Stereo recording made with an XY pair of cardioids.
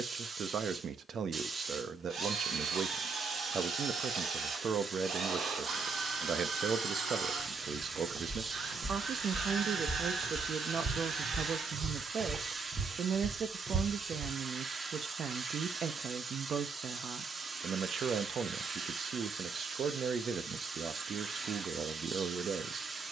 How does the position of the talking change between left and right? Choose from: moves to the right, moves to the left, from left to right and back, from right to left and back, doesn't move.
doesn't move.